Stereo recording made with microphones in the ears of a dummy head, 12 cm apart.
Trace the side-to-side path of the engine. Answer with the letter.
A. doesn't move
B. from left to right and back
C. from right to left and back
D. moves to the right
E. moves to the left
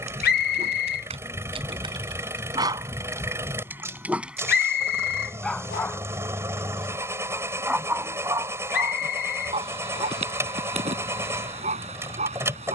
A.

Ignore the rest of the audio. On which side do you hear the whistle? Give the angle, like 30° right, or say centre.
80° left.